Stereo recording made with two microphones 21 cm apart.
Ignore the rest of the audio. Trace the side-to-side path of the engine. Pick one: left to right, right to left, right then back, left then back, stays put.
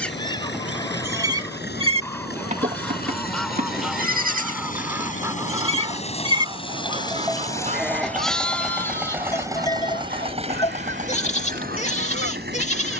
left to right.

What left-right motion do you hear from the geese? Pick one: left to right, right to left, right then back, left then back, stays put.
left to right.